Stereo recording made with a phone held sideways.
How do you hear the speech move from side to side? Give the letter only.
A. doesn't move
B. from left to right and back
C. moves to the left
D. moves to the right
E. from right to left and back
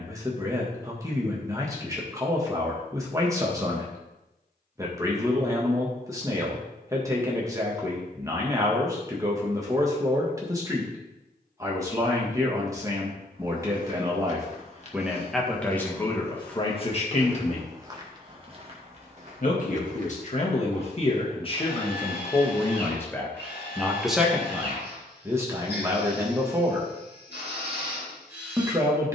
E.